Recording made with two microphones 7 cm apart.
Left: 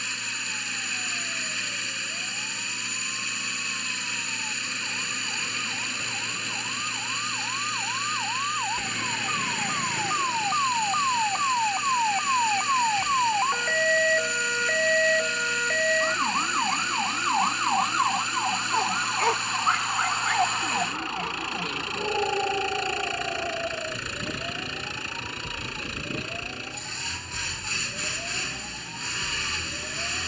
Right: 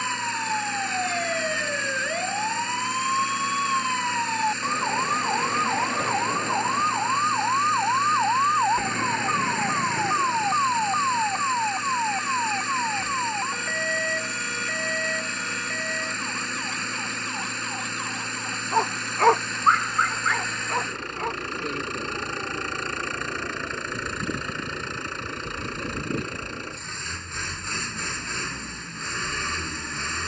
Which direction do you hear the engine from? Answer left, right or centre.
right.